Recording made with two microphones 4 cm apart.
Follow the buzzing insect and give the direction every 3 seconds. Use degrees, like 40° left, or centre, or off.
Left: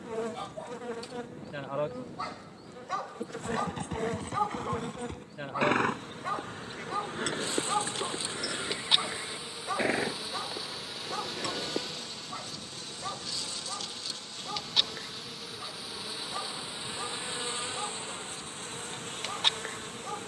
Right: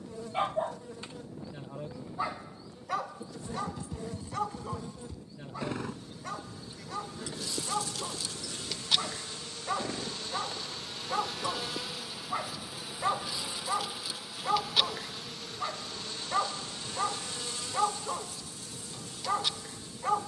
50° left, 50° left, 40° left, 10° left, 10° right, 10° left, 40° left.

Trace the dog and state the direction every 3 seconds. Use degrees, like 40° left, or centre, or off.
30° right, 10° left, 10° left, 10° right, 40° right, 50° right, 50° right.